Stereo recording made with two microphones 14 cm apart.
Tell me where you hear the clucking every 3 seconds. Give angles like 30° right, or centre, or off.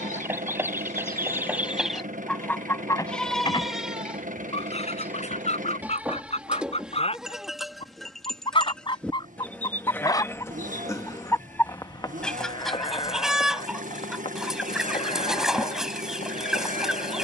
centre, 50° left, 50° left, 20° left, centre, centre.